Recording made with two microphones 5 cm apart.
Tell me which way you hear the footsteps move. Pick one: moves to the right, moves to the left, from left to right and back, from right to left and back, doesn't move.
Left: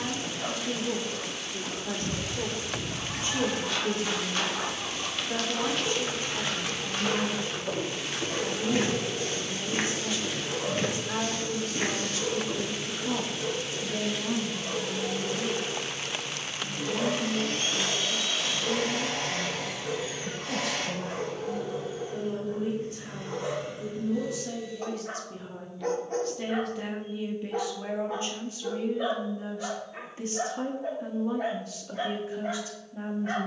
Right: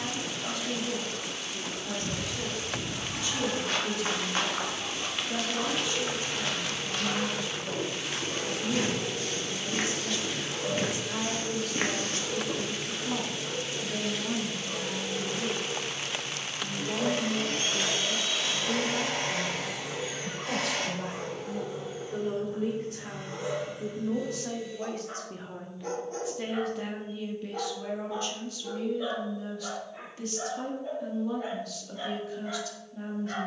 from right to left and back.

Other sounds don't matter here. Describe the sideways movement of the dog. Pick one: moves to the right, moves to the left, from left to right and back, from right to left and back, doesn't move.
doesn't move.